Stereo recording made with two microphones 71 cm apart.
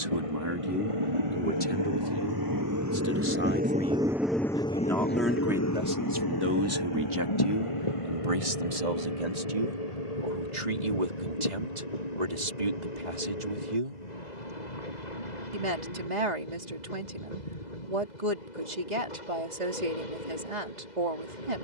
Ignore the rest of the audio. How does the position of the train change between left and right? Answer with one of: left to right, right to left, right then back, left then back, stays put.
right to left.